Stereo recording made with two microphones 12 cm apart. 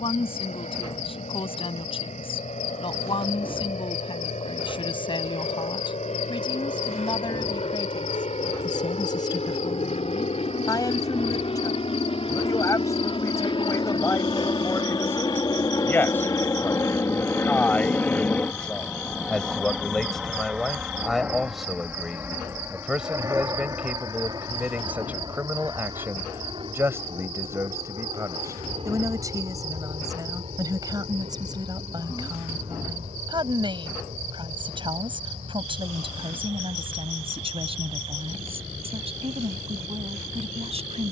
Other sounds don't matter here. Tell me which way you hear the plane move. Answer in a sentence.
You can hear the plane go from the left side to the right.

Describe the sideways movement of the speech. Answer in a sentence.
You can hear the speech go from the left side to the right.